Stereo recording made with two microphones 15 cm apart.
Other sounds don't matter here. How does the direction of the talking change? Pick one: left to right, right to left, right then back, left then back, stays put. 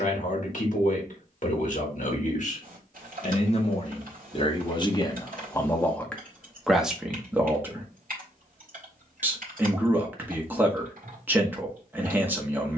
left to right.